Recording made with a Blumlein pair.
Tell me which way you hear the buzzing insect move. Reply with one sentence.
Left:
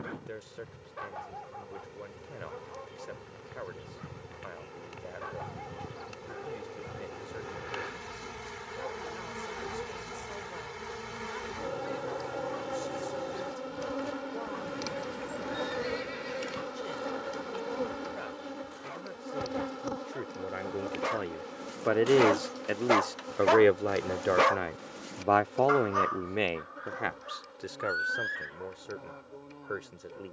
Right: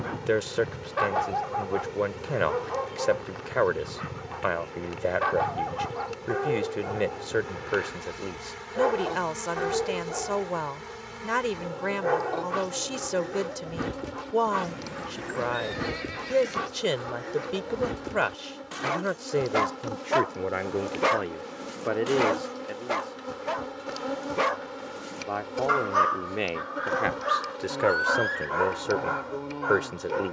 In this clip you hear the buzzing insect move from right to left and back again.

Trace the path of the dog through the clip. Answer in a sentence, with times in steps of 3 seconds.
In this clip you hear the dog on the right from 0 s, in the centre from 21 s and on the right from 27 s.